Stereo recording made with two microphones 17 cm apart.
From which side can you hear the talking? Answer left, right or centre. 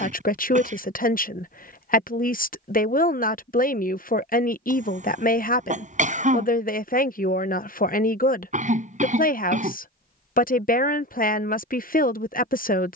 left.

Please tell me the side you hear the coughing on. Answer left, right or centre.
right.